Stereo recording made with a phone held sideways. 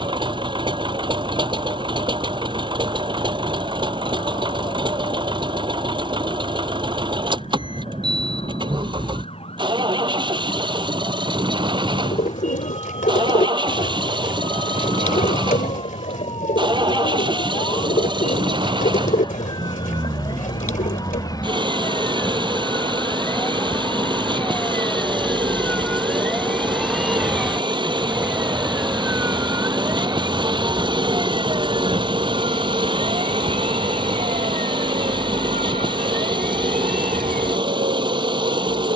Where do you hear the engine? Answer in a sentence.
In this clip you hear the engine on the right.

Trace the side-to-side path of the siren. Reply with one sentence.
In this clip you hear the siren travel towards the right.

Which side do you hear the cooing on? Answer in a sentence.
You can hear the cooing on the left.